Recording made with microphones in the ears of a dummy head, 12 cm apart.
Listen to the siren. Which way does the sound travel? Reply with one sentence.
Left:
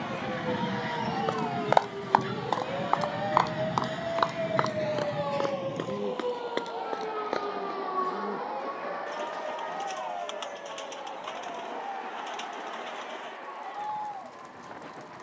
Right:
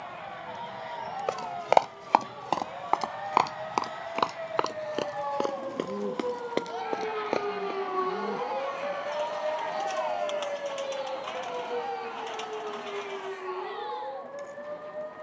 In this clip you hear the siren move to the right.